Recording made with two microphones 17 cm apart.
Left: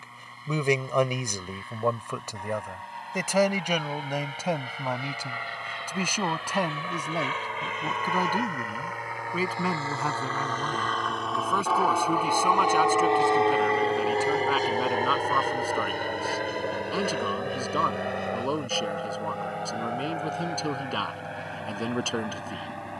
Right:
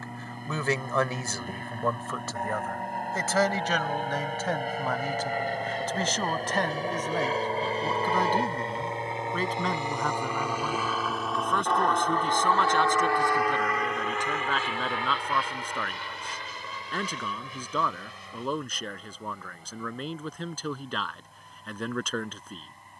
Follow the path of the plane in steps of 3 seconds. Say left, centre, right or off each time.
right, right, right, centre, left, left, left, left.